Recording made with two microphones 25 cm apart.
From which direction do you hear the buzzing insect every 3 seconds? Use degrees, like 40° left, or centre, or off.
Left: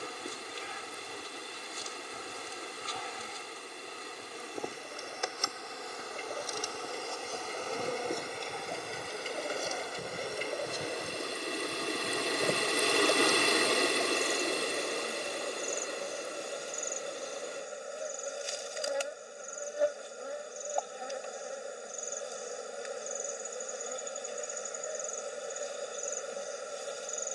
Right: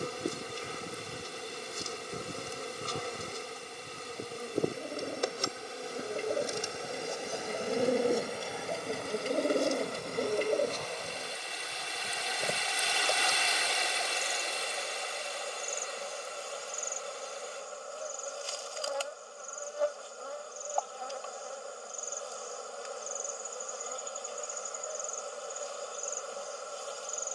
50° right, 40° right, 10° right, 10° left, 20° left, 20° left, 20° left, 20° left, 20° left.